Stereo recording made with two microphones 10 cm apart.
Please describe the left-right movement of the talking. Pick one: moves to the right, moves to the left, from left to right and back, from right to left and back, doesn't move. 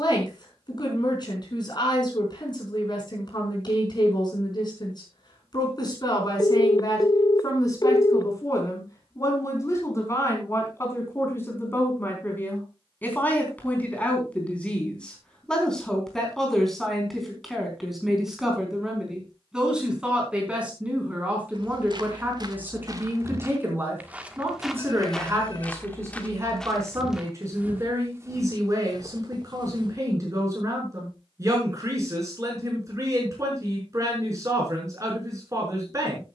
moves to the right.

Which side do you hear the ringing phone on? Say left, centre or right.
left.